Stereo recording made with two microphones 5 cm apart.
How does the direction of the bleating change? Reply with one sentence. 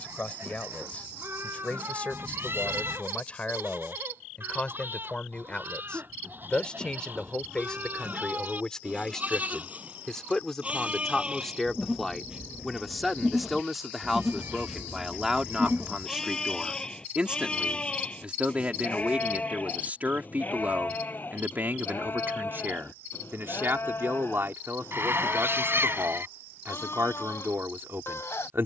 You can hear the bleating move from right to left.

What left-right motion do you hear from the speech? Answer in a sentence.
In this clip you hear the speech move from left to right.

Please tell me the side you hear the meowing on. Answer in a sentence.
You can hear the meowing on the right.